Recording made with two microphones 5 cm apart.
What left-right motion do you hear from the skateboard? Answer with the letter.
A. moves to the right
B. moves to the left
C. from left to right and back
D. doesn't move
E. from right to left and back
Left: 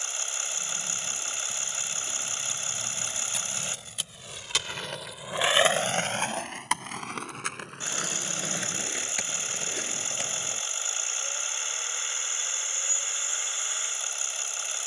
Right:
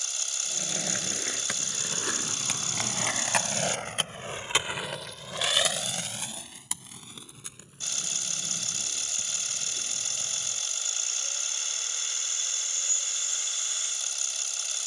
B.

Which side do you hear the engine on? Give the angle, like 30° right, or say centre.
30° left.